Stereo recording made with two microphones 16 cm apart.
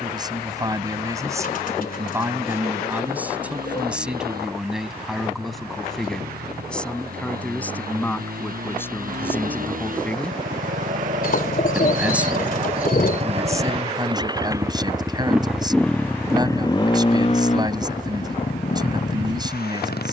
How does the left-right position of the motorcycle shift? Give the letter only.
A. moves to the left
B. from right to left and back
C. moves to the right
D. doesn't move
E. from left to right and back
A.